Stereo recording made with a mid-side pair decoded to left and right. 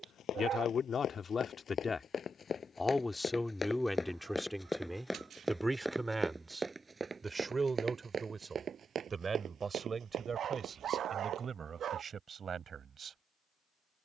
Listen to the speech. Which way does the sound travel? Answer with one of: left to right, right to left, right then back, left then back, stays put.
left to right.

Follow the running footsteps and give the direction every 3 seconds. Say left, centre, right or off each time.
left, centre, right, right, off.